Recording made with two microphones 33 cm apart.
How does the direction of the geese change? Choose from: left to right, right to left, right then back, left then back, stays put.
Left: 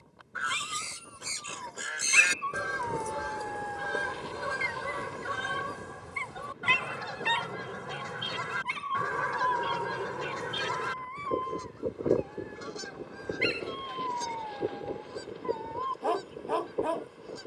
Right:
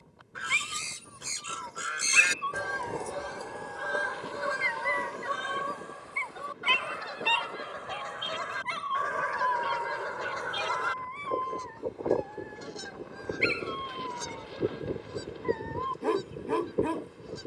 left then back.